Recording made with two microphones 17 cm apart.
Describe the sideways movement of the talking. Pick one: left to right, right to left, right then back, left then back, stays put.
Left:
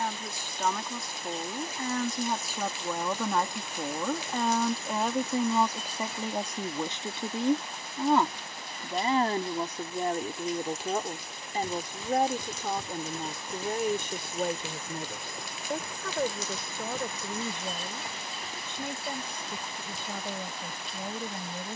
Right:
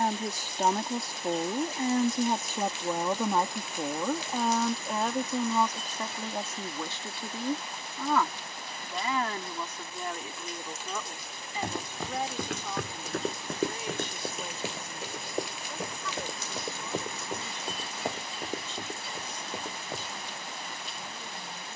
right to left.